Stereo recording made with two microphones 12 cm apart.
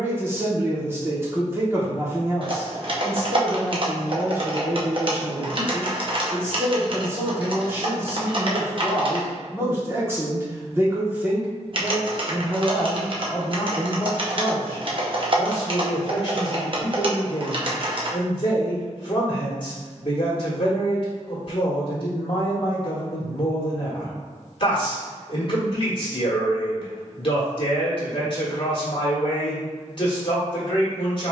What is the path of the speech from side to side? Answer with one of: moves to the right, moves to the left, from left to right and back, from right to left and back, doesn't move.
moves to the left.